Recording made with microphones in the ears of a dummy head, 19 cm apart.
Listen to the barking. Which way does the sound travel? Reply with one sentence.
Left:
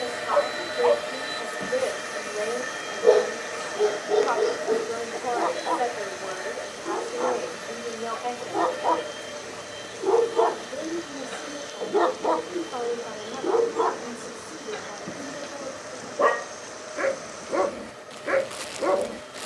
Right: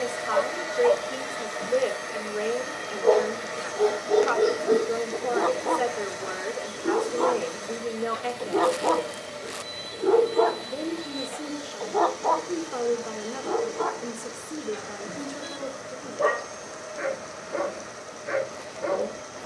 In this clip you hear the barking move from left to right and back again.